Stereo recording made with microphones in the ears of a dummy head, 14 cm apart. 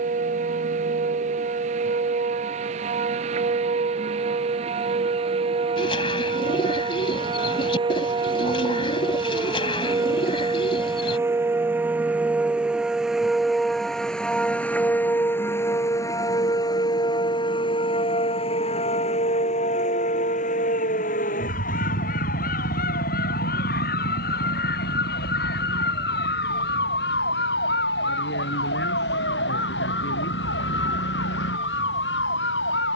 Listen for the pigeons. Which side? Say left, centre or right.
left.